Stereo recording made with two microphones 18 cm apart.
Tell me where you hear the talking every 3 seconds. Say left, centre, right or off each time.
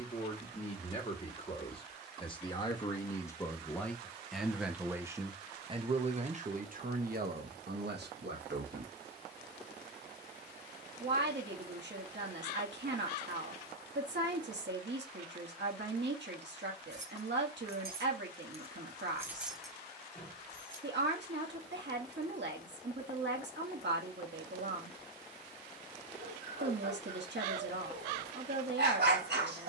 left, centre, right, right, right, right, right, right, right, right.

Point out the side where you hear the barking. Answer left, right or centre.
right.